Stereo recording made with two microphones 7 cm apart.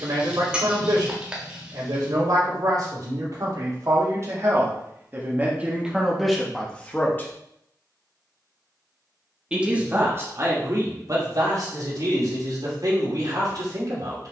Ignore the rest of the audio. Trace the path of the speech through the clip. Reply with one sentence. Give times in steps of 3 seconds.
You can hear the speech on the right from 0 s, in the centre from 6 s and on the right from 9 s.